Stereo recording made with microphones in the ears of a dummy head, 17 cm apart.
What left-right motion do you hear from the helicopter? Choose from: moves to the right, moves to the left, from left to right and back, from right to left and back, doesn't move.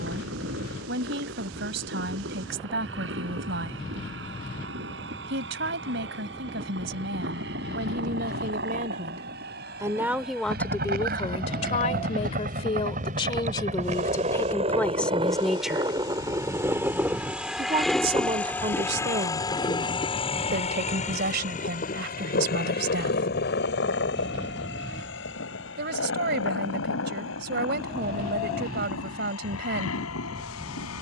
moves to the left.